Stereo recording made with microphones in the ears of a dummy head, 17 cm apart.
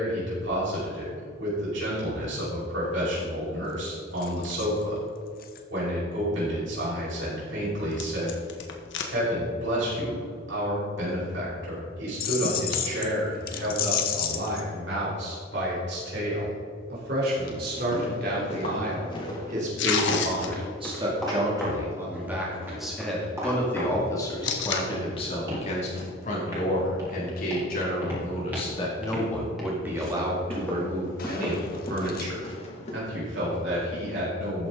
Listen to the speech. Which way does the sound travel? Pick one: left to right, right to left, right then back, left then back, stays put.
left then back.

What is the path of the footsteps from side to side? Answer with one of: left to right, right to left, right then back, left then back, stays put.
right then back.